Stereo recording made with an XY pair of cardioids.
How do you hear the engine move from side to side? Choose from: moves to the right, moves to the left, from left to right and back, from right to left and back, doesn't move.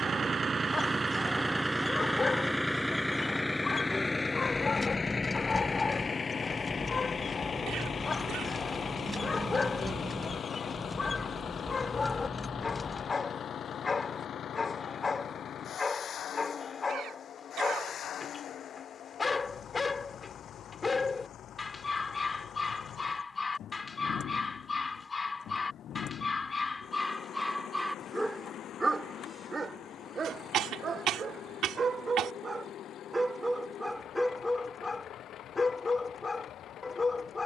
moves to the left.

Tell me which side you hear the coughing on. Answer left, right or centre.
right.